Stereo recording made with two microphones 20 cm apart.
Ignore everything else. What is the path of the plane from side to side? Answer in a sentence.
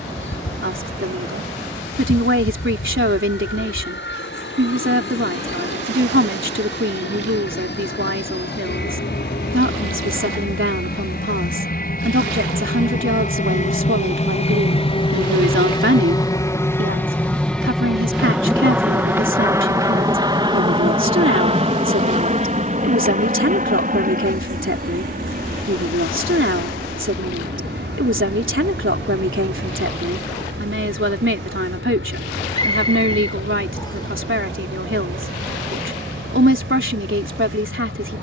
You can hear the plane go from the left side to the right.